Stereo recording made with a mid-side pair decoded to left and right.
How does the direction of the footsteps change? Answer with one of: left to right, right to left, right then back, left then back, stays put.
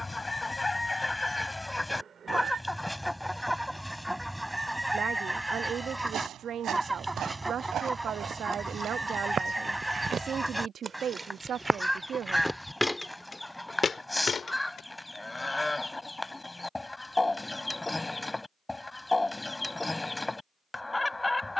right to left.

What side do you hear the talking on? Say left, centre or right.
right.